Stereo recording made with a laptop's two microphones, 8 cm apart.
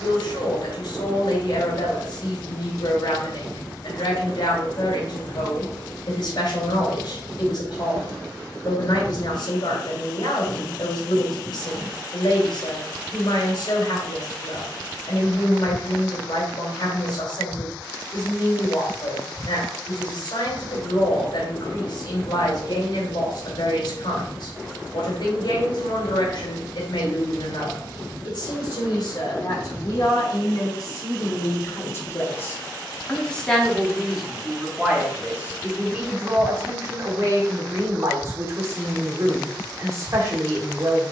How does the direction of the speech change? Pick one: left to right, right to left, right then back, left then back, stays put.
left to right.